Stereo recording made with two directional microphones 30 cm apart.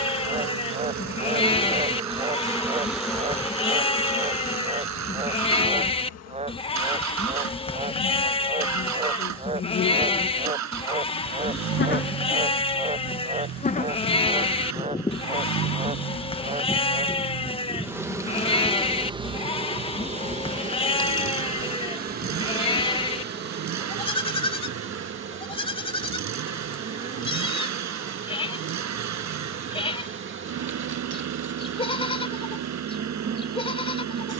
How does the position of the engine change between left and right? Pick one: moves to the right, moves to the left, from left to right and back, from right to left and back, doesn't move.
doesn't move.